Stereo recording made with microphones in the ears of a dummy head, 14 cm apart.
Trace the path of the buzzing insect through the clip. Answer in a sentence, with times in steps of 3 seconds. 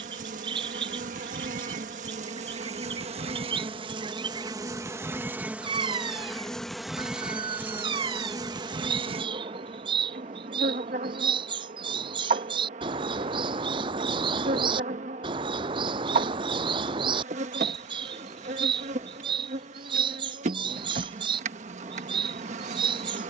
In this clip you hear the buzzing insect on the right from 0 s, in the centre from 6 s and on the right from 9 s.